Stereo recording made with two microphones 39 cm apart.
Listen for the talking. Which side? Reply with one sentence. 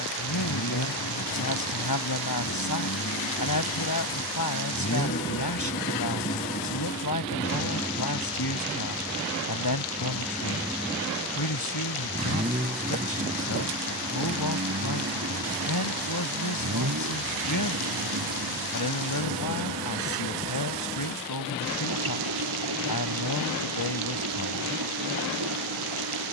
You can hear the talking on the left.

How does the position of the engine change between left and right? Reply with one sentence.
You can hear the engine move from left to right.